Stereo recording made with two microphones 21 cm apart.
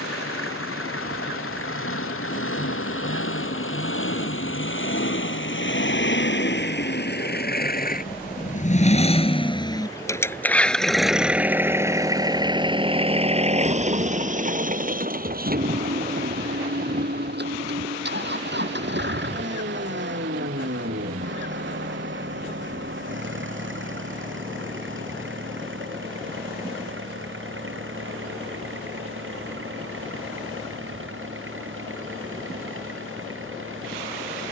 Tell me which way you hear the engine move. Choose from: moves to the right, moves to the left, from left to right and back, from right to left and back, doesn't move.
moves to the right.